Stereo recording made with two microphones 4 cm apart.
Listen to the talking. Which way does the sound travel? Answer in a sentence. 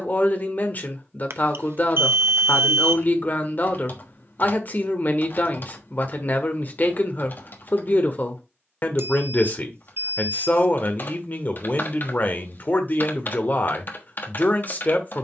In this clip you hear the talking stay in one place.